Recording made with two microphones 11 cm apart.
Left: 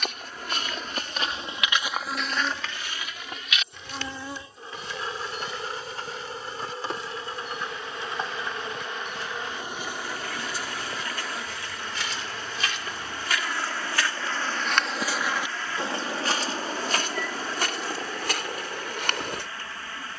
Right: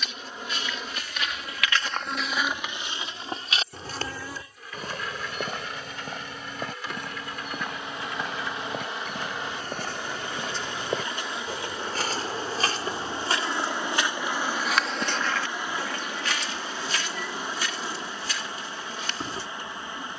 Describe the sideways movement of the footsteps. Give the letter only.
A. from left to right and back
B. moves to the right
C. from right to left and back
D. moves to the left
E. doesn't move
A.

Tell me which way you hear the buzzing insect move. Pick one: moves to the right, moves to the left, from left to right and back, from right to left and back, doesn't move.
from right to left and back.